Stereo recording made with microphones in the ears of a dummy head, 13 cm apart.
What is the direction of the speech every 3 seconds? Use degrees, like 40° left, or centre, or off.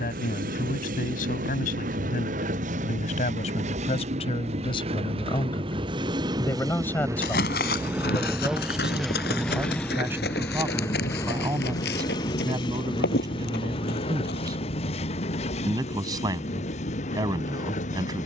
60° left, 40° left, 10° left, 20° right, 30° right, 30° right.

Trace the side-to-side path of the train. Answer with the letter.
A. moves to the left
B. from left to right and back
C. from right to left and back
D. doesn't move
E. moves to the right
A.